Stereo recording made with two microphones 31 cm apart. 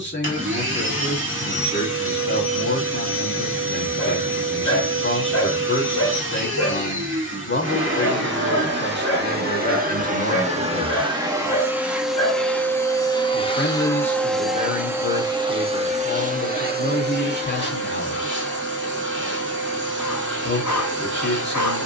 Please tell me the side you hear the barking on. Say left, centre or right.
left.